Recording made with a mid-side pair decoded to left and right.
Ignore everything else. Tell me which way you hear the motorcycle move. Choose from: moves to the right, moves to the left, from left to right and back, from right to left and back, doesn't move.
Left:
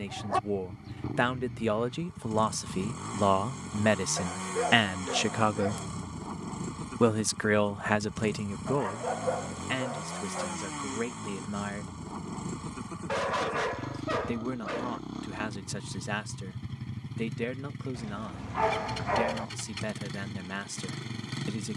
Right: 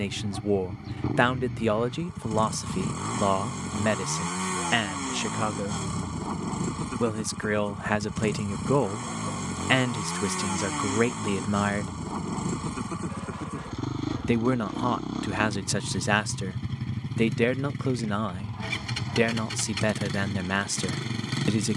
doesn't move.